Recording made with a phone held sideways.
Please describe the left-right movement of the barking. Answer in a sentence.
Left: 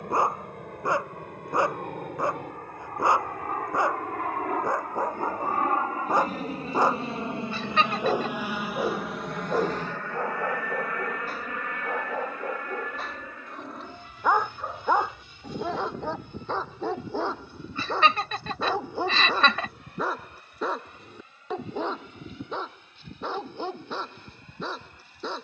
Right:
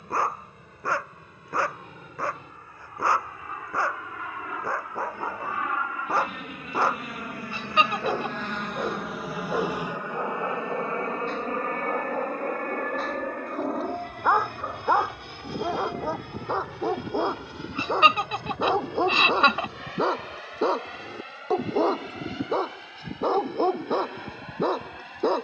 In this clip you hear the barking move to the right.